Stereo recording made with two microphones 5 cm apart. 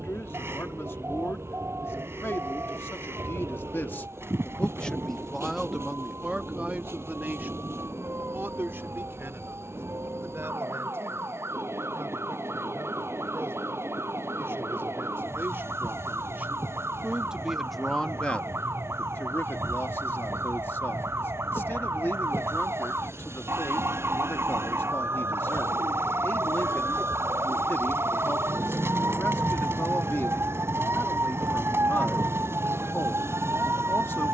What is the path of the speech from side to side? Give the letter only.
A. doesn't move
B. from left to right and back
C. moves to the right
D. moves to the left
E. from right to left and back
B.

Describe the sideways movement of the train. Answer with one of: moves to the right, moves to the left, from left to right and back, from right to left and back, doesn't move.
doesn't move.